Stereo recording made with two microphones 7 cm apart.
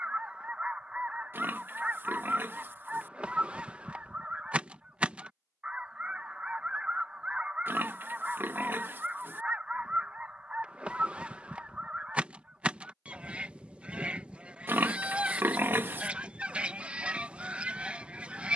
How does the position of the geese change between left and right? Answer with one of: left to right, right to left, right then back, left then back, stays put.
stays put.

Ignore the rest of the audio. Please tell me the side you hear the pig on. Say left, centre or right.
right.